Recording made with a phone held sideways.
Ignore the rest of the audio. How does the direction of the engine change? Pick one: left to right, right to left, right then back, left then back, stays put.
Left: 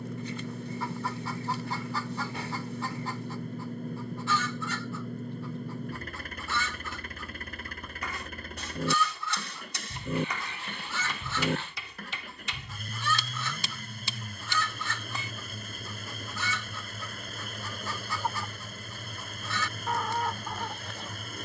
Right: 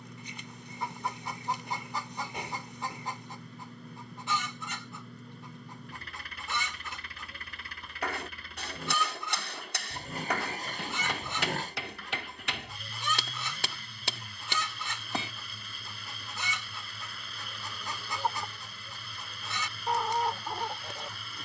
stays put.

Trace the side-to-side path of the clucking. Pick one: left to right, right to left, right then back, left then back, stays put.
stays put.